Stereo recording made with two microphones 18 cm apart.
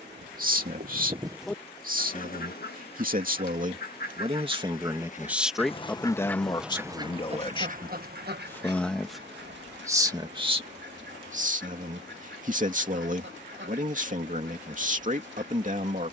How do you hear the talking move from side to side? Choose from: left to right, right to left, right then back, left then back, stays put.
left then back.